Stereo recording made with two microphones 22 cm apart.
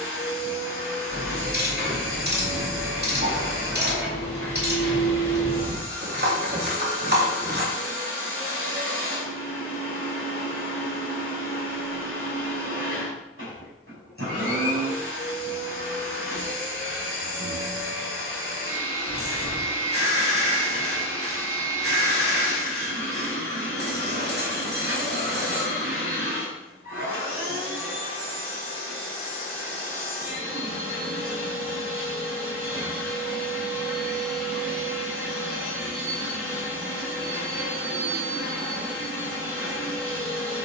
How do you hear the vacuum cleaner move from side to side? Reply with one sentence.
You can hear the vacuum cleaner stay in one place.